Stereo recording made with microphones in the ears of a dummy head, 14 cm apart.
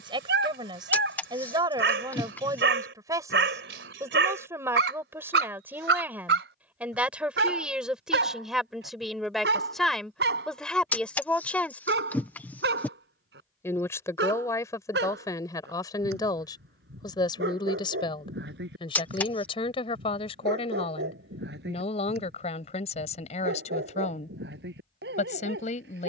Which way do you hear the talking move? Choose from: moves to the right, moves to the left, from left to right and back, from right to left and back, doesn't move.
moves to the left.